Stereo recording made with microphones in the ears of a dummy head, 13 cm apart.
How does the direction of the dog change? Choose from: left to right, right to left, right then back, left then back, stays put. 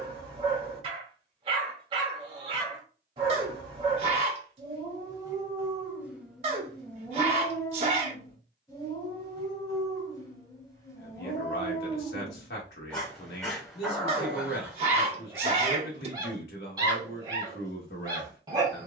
left then back.